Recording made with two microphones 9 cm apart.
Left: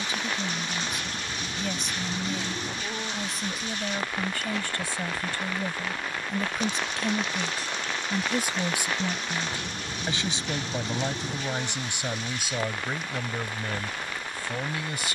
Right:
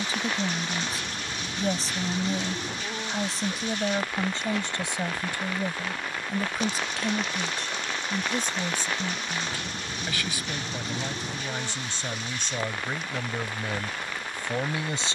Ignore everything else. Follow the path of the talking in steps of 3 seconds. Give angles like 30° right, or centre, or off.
30° right, 20° right, centre, 20° left, centre.